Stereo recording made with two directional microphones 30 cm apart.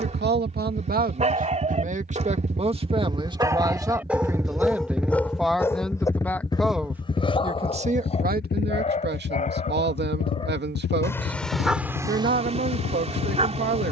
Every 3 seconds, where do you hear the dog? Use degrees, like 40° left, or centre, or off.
20° right, centre, 20° left, 10° left, 20° right.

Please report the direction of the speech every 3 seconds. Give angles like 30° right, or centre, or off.
30° right, 10° right, 20° right, 30° right, 30° right.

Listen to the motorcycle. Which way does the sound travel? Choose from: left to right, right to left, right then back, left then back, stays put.
right to left.